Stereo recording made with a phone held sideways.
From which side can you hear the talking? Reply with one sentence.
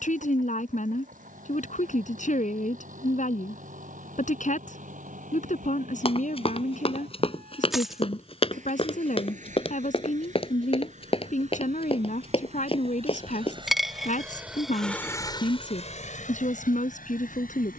You can hear the talking on the left.